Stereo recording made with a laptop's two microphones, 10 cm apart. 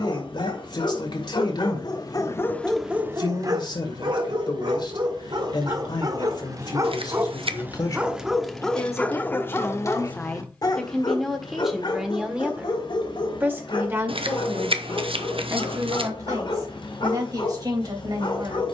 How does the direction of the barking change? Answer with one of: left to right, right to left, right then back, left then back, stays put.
right then back.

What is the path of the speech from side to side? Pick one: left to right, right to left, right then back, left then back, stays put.
left to right.